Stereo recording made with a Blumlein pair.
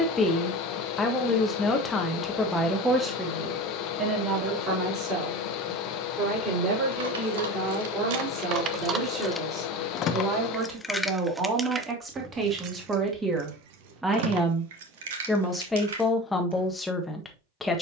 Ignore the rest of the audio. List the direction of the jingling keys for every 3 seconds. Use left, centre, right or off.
off, off, right, centre, right, right.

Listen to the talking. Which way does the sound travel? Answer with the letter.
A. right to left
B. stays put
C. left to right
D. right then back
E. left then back
D.